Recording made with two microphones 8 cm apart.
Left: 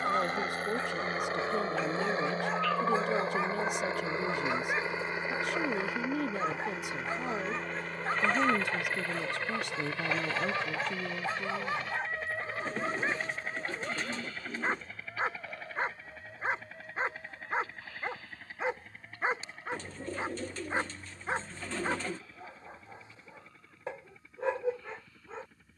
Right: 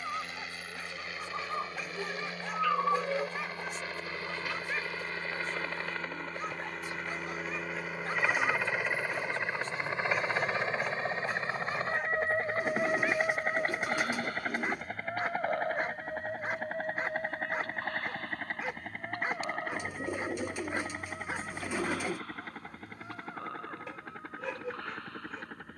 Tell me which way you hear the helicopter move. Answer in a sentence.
You can hear the helicopter move from left to right.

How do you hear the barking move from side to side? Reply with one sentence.
In this clip you hear the barking stay put.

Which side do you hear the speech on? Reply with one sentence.
In this clip you hear the speech on the left.